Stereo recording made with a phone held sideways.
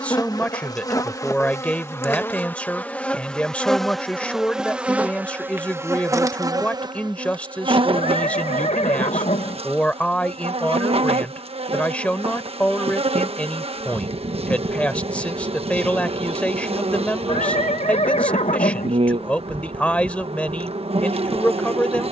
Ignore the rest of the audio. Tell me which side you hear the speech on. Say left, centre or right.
centre.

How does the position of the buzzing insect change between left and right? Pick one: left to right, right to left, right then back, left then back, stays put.
left to right.